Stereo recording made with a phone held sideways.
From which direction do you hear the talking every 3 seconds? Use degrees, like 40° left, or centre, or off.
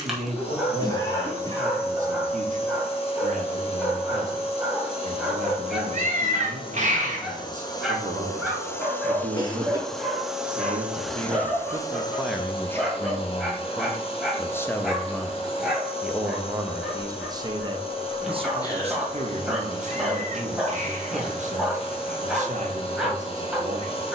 60° right, 60° right, 60° right, 50° right, 10° left, 20° right, 50° right, 50° right.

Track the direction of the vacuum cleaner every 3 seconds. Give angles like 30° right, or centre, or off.
40° left, 40° left, 30° left, 10° left, 40° left, 40° left, 40° left, 40° left.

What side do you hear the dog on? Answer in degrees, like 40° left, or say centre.
centre.